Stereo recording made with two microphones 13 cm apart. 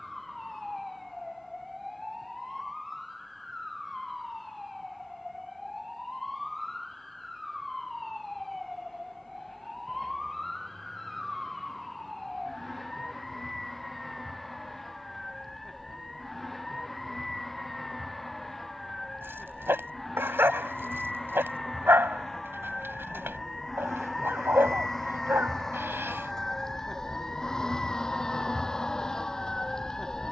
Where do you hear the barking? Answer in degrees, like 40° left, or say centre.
20° right.